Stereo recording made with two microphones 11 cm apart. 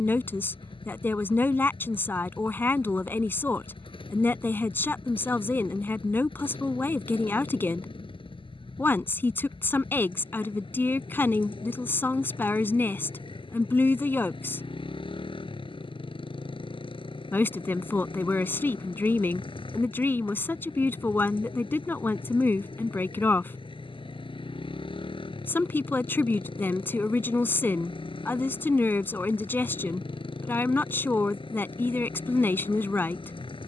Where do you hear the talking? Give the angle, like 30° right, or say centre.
20° left.